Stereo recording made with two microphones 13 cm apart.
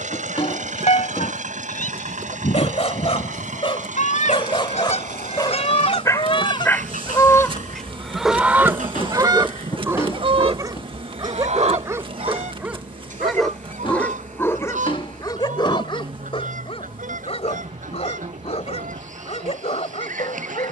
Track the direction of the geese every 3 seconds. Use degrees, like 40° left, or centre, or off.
70° left, 60° left, 10° left, 50° right, 70° right, 80° right, 80° right.